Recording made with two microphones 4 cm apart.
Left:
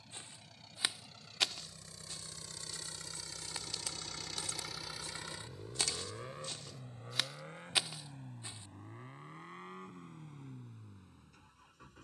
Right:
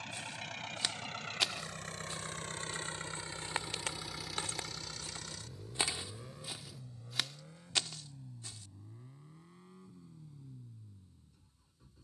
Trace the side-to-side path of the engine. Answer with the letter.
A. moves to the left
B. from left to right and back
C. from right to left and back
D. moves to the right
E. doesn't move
A.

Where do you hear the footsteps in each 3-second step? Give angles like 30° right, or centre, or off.
centre, 40° right, centre, off.